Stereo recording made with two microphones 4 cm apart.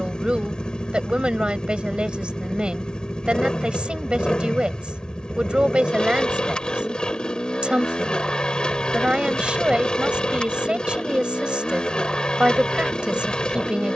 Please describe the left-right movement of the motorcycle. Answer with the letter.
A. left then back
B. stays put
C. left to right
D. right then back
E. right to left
B.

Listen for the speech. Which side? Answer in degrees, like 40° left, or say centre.
20° right.